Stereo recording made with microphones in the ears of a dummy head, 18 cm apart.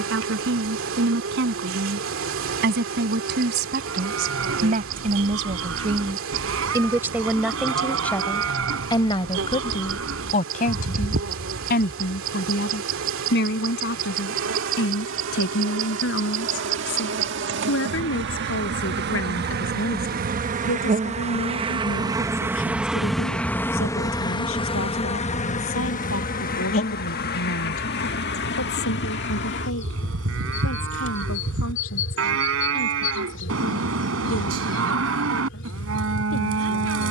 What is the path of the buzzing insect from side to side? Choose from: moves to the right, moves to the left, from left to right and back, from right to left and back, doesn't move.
moves to the left.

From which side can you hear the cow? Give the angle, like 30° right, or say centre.
80° right.